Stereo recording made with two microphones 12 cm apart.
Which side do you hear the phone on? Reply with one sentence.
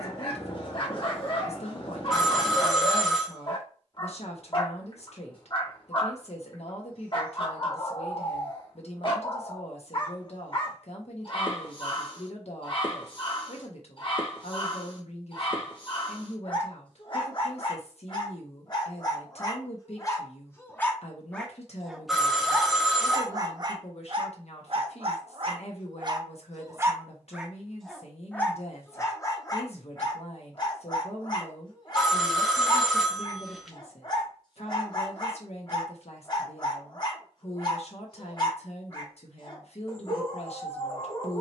In this clip you hear the phone in the centre.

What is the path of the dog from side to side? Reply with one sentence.
You can hear the dog move from left to right and back again.